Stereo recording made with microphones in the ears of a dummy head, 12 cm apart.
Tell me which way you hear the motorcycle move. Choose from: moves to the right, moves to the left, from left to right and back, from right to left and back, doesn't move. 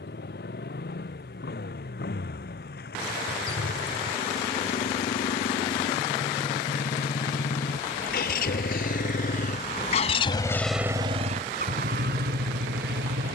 moves to the right.